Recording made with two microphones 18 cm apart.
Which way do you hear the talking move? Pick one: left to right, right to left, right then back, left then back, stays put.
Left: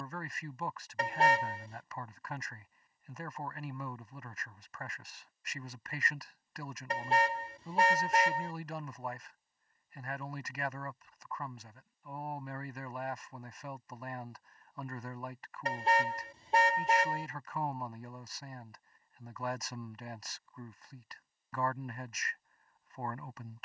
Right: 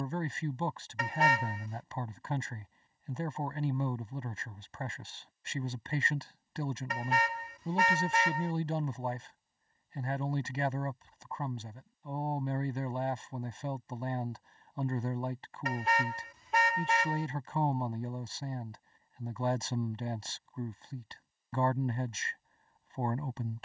stays put.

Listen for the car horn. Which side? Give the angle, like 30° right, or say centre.
30° left.